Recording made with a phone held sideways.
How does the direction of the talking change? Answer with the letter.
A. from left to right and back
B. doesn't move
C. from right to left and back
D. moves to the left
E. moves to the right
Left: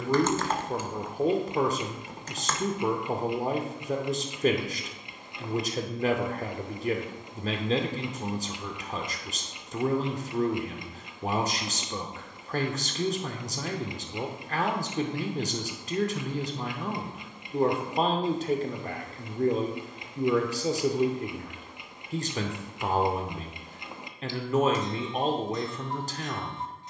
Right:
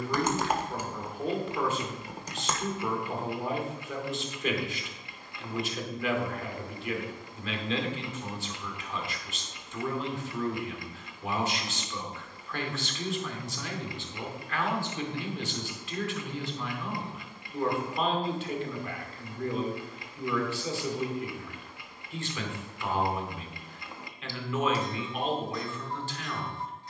B.